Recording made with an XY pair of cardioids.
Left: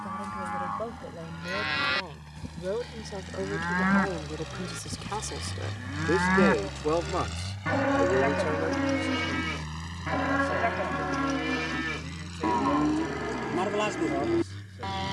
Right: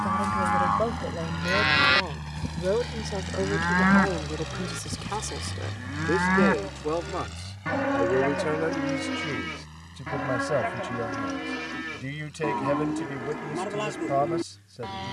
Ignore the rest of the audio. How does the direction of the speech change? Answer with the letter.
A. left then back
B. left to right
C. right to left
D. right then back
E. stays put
A.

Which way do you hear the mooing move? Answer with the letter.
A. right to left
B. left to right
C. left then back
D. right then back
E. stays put
A.